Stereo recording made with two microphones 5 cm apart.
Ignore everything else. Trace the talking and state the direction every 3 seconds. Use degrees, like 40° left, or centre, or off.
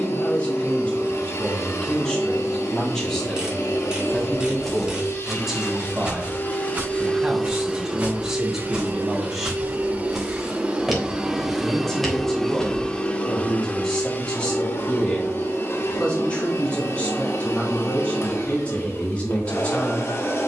20° left, centre, 10° right, centre, 10° left, 20° left, 20° left.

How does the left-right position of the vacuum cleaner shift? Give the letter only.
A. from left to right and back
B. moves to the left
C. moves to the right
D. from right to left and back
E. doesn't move
A.